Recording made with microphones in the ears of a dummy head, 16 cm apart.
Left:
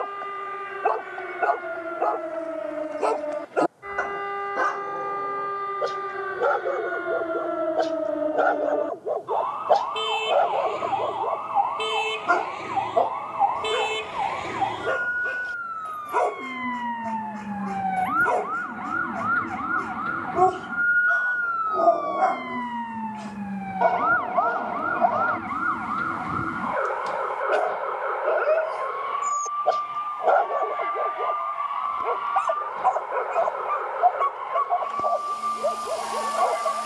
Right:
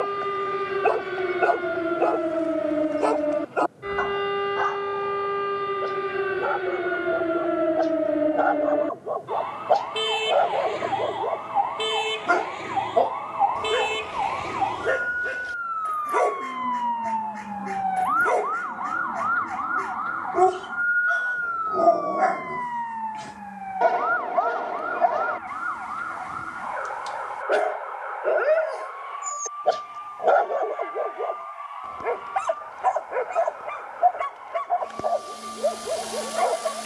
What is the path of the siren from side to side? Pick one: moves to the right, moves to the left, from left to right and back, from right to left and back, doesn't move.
moves to the left.